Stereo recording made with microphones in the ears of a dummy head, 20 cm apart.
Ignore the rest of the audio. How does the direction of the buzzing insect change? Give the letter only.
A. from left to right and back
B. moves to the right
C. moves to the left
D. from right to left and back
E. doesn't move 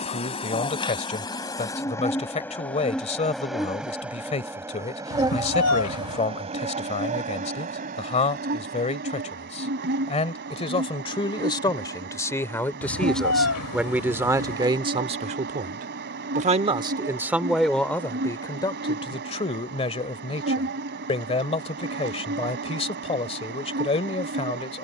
B.